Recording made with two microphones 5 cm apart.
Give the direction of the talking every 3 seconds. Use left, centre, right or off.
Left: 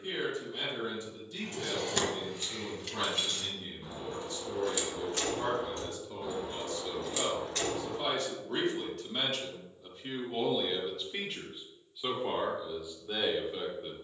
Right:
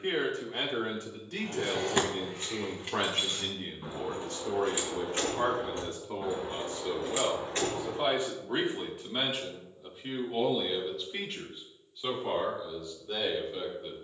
right, right, right, centre, centre.